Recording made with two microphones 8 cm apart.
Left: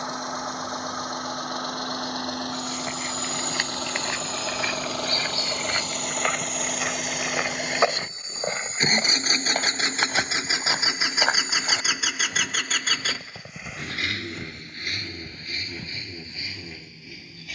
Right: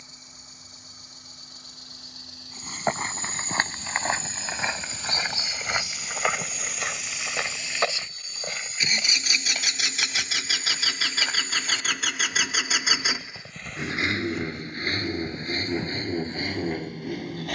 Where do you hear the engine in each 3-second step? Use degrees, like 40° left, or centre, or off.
70° left, 70° left, 60° left, 30° left, 20° right, 50° right.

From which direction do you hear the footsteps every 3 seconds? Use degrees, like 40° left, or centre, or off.
40° right, 30° right, 10° left, 50° left, 10° left, 30° right.